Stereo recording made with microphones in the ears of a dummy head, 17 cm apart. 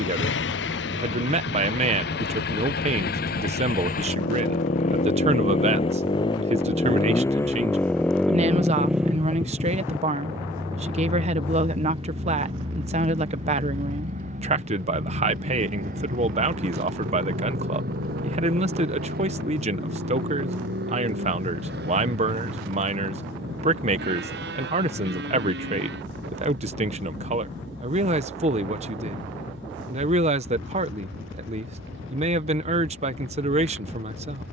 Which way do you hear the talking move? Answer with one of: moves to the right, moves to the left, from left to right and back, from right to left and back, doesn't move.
doesn't move.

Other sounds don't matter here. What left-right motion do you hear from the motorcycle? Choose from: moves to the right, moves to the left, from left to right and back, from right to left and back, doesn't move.
moves to the right.